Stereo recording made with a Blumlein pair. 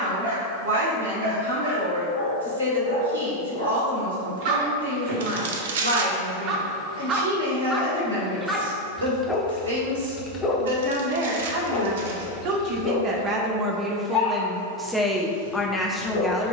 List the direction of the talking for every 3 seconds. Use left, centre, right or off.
right, right, right, right, right, centre.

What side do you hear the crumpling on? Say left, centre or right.
right.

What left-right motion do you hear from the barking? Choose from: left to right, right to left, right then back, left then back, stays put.
right to left.